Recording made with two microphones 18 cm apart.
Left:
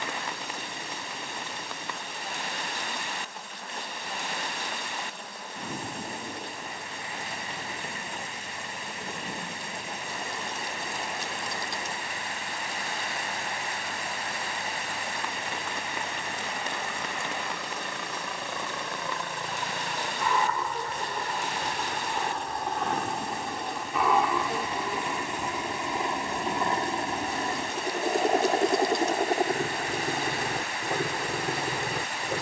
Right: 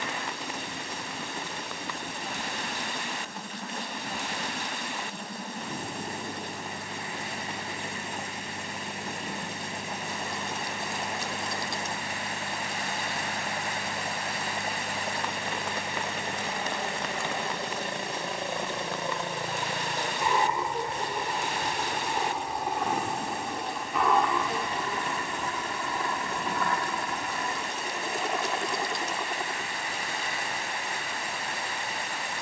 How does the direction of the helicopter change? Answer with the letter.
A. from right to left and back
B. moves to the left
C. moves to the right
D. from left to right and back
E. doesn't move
B.